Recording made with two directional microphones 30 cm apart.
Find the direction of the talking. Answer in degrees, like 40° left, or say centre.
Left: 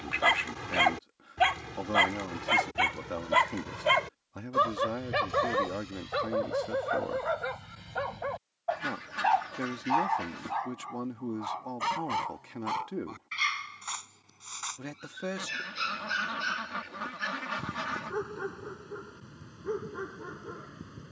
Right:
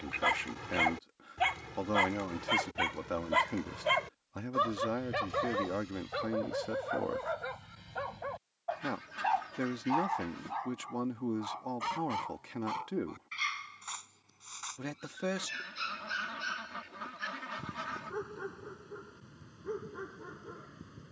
10° right.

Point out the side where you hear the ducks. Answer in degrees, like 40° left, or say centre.
40° left.